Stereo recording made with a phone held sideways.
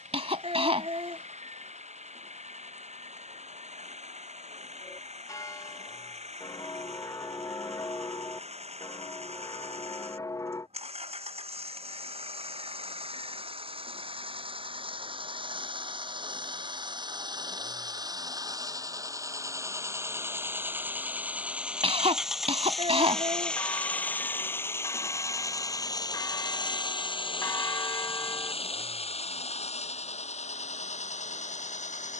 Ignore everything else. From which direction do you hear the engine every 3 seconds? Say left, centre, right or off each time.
right, right, right, right, right, right, right, centre, left, left, left.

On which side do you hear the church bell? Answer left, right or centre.
left.